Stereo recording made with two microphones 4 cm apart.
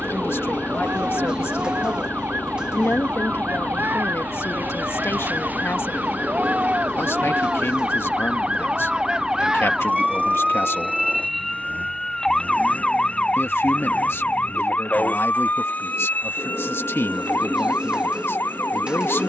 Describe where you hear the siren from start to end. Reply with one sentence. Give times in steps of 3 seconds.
In this clip you hear the siren on the right from 0 s, in the centre from 9 s and on the left from 12 s.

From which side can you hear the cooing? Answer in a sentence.
You can hear the cooing on the right.